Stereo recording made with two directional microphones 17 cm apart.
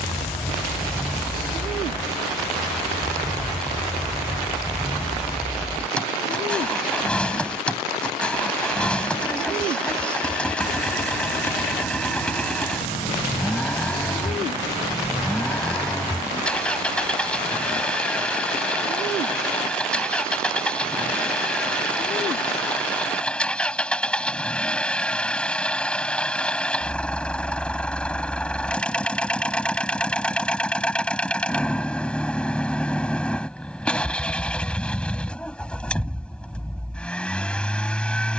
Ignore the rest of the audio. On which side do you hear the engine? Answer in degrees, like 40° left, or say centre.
10° left.